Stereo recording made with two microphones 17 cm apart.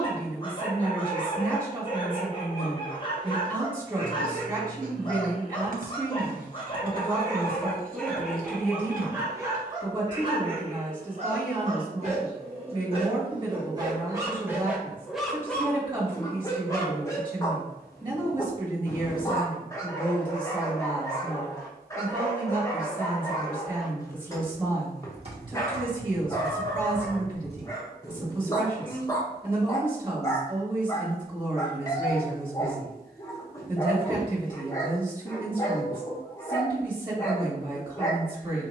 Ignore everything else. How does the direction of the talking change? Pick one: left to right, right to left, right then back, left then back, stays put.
stays put.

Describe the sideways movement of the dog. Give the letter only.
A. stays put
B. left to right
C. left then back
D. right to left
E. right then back
E.